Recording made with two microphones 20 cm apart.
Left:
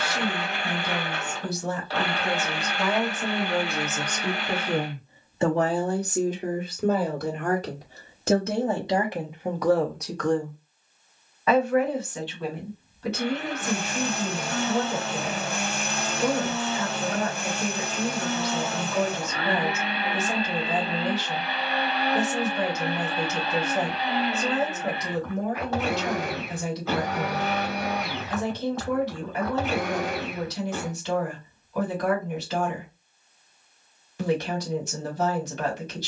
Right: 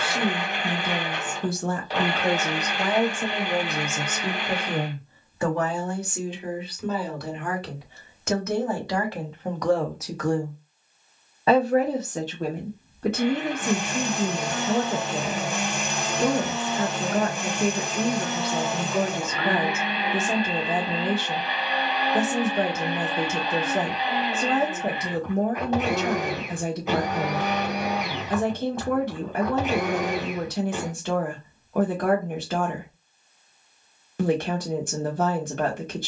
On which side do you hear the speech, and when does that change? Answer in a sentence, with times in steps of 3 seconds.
In this clip you hear the speech on the right from 0 s, in the centre from 3 s, on the left from 6 s, in the centre from 9 s and on the right from 12 s.